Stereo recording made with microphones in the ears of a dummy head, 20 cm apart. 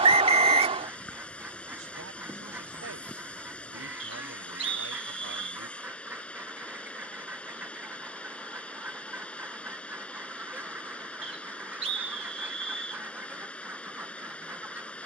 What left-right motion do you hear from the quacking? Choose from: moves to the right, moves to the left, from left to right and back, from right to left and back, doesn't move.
doesn't move.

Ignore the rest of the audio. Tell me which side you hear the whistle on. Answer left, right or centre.
right.